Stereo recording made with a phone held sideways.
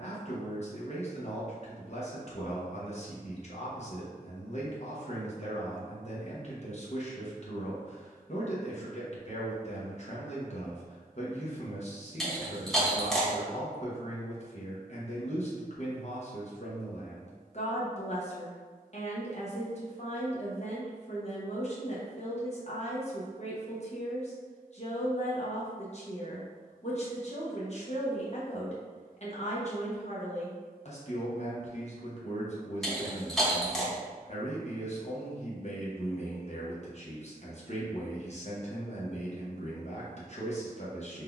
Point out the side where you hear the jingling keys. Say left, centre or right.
centre.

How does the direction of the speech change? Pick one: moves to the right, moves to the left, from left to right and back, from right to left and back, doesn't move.
doesn't move.